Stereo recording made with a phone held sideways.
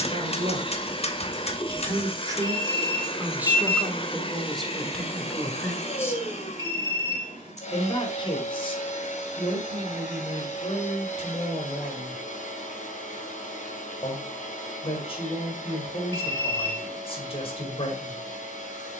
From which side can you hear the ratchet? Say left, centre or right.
left.